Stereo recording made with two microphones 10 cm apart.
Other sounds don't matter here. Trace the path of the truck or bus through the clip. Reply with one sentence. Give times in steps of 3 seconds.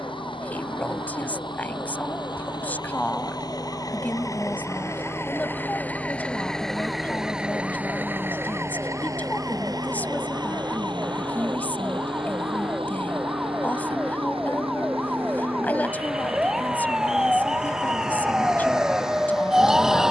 You can hear the truck or bus on the left from 0 s, in the centre from 6 s and on the right from 9 s.